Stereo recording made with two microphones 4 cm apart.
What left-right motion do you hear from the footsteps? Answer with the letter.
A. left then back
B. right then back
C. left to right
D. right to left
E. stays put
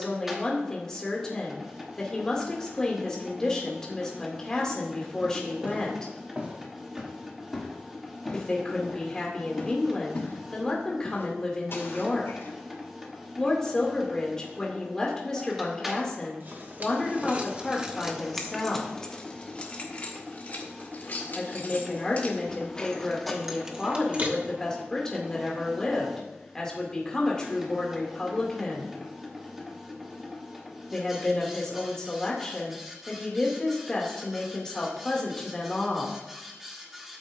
D.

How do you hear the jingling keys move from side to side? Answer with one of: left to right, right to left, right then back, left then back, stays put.
left then back.